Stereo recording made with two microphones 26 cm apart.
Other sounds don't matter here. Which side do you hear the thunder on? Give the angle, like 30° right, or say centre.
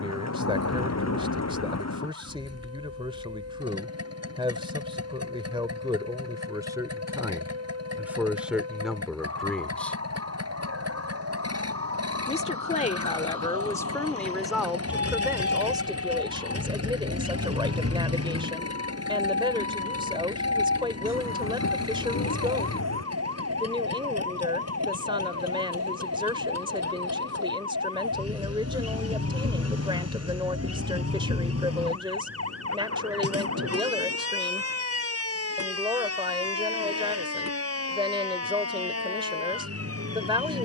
80° left.